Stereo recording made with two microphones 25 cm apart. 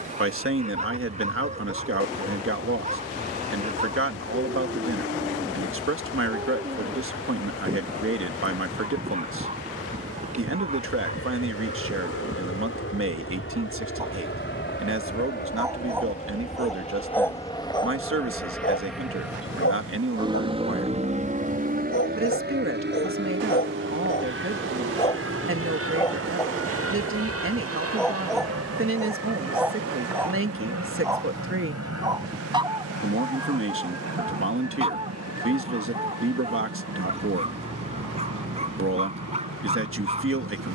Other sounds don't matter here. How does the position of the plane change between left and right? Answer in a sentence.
You can hear the plane move from left to right.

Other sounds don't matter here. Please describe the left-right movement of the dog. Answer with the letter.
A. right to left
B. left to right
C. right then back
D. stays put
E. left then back
E.